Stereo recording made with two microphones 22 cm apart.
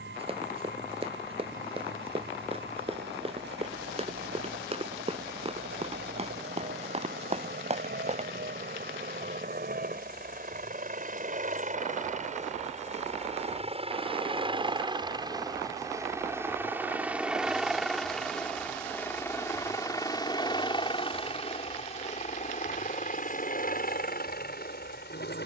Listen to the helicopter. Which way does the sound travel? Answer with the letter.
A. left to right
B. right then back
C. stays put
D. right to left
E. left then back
D.